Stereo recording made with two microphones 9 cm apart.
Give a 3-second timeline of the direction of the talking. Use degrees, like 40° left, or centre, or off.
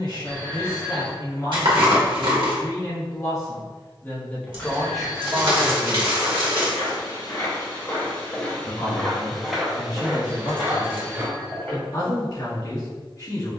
50° left, 10° left, 20° left, 40° left, 40° left.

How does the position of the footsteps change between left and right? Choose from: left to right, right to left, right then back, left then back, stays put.
left to right.